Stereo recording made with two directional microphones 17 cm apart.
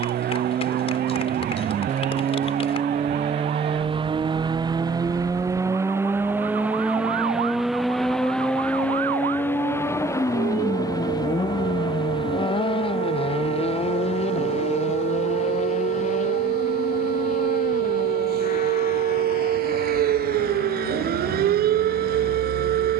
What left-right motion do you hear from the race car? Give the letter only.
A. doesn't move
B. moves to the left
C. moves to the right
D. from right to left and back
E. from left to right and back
B.